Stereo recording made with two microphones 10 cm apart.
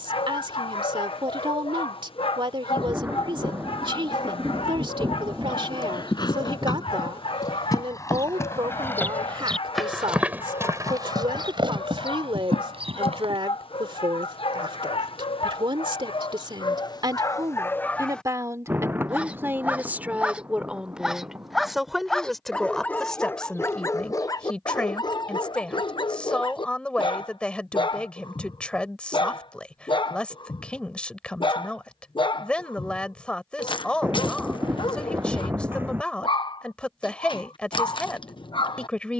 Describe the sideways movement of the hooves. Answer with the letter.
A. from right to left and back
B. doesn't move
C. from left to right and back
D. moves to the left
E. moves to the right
E.